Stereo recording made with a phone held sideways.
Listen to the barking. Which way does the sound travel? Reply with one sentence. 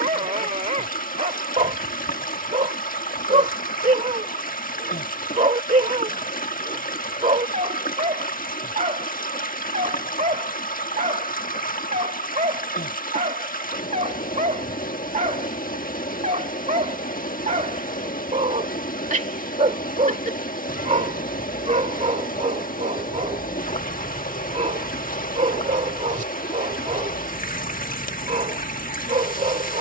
In this clip you hear the barking stay in one place.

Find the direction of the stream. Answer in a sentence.
In this clip you hear the stream on the left.